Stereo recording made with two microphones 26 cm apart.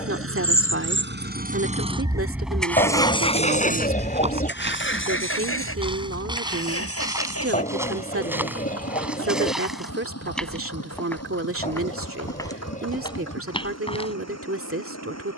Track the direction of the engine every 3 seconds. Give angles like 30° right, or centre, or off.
30° right, 40° left, 60° left, 70° left, 70° left.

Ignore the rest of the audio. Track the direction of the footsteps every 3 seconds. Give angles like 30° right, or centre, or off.
off, 20° right, 10° right, centre, 20° left.